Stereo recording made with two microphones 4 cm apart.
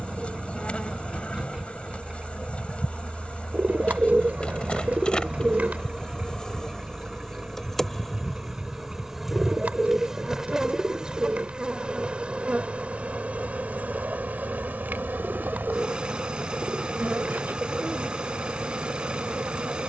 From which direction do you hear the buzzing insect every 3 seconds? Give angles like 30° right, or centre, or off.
30° left, 30° left, 10° left, 10° right, 40° right, 60° right, 60° right.